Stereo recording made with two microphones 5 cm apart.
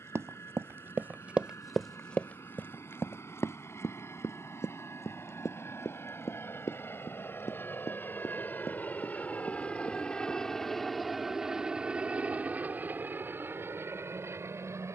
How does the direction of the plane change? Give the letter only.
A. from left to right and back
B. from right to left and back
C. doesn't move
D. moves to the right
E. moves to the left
D.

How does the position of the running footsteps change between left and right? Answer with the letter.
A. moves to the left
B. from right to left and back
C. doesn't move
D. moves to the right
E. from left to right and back
A.